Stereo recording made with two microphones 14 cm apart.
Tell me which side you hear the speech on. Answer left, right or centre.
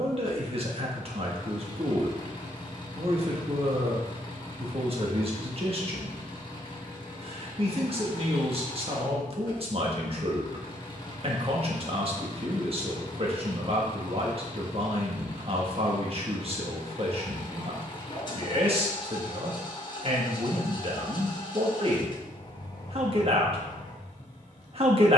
right.